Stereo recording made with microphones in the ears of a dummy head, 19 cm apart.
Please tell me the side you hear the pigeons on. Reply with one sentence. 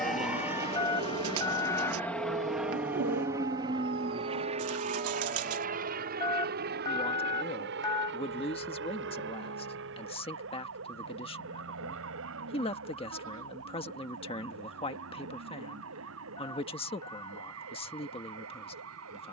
You can hear the pigeons on the right.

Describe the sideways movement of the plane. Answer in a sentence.
In this clip you hear the plane travel towards the right.